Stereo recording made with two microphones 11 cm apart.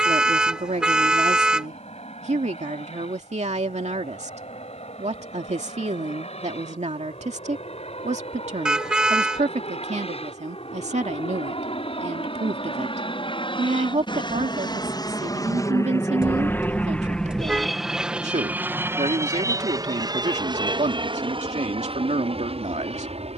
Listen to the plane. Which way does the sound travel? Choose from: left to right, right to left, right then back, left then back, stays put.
left to right.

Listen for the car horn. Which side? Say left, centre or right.
centre.